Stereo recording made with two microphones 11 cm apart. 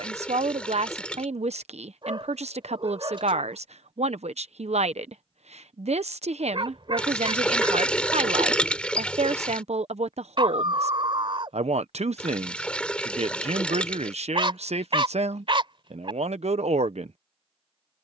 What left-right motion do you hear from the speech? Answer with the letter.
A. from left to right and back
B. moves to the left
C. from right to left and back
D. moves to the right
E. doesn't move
E.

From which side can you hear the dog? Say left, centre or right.
right.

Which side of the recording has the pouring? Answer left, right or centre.
centre.